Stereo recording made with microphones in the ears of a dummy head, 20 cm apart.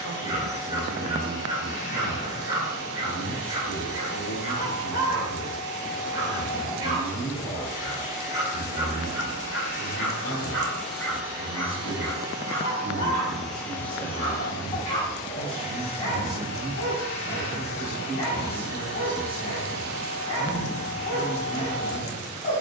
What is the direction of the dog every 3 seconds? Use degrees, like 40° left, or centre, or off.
20° right, 20° right, 20° right, centre, 30° left, 30° left, 30° left, 30° left.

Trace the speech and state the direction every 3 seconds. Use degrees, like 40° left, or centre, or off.
50° left, 50° left, 50° left, 50° left, 30° left, centre, 10° right, 10° right.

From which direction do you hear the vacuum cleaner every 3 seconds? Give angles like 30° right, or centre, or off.
30° left, 30° left, 30° left, 10° left, centre, 30° left, 30° left, 30° left.